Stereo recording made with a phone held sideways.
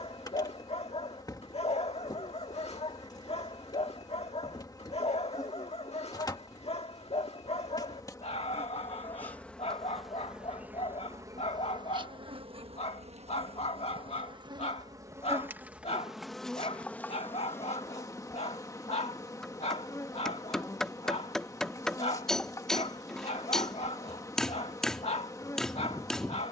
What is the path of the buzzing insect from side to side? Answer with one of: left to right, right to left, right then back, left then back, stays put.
right then back.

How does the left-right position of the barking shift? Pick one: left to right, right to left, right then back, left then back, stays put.
stays put.